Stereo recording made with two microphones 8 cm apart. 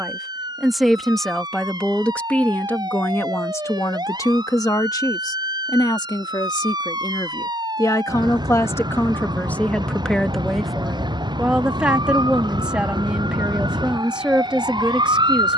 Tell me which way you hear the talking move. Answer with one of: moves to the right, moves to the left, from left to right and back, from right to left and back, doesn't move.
from right to left and back.